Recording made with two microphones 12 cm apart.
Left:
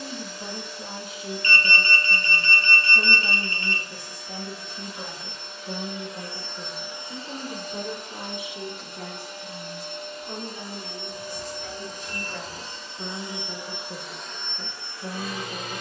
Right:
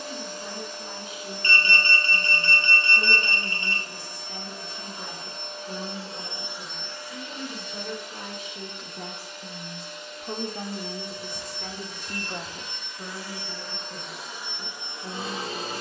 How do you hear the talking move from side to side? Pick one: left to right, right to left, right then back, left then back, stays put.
right then back.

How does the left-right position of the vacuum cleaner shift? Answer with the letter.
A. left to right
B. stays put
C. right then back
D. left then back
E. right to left
D.